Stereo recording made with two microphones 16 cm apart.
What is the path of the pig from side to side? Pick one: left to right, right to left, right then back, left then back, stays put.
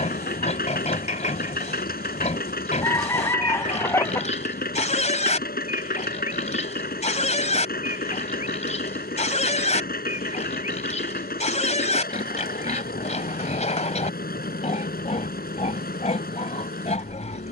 stays put.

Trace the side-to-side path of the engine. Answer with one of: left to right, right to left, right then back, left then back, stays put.
stays put.